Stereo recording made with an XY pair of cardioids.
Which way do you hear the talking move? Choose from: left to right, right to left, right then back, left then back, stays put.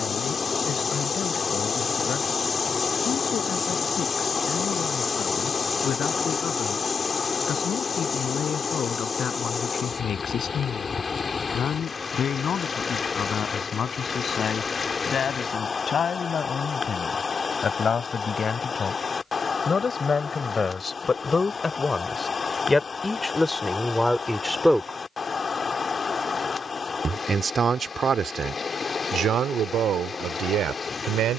left to right.